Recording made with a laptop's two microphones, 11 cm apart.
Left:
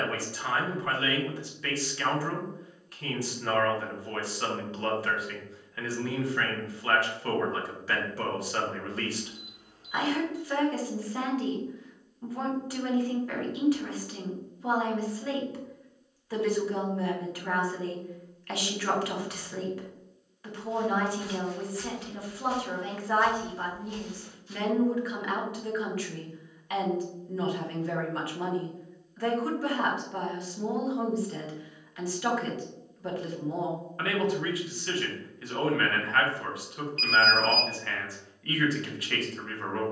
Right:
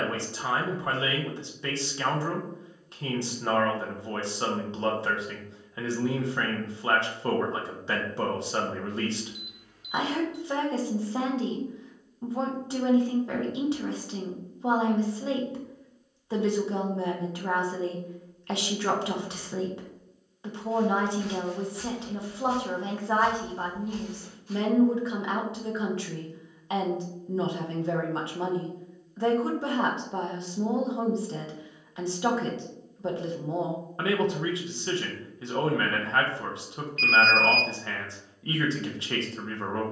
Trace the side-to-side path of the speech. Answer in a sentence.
In this clip you hear the speech stay in one place.